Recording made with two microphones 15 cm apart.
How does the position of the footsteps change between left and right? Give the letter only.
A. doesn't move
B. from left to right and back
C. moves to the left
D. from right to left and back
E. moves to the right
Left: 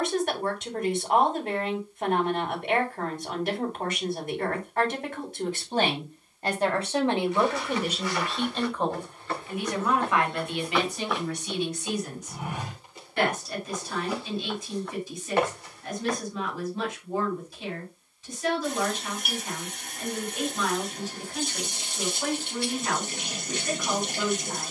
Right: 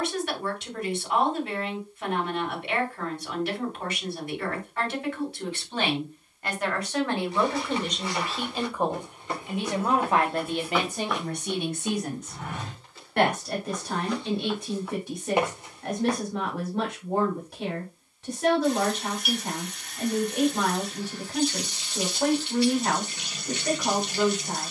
D.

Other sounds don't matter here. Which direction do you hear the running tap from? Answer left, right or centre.
left.